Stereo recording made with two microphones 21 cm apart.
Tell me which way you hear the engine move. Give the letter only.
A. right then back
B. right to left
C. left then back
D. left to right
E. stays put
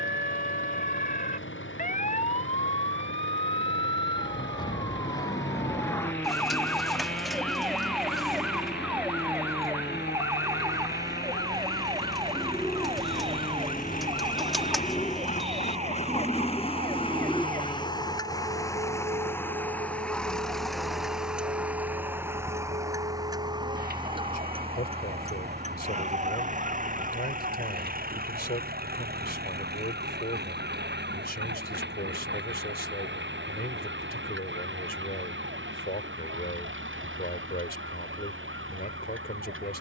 D.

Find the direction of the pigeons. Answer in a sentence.
You can hear the pigeons in the centre.